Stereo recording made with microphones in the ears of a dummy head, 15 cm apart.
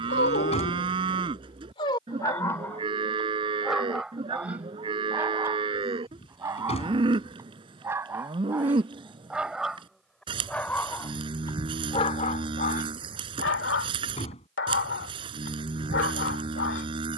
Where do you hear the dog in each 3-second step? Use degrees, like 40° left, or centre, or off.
40° left, 10° right, 20° right, 10° left, 60° left, 70° left.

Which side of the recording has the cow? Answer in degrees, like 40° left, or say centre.
30° right.